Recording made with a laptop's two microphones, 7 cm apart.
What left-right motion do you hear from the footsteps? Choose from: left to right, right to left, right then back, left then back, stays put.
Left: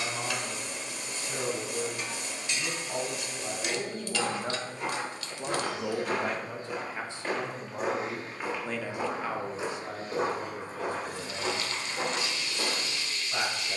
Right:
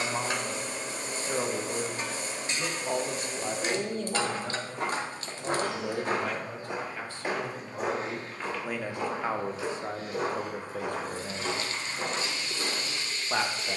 right to left.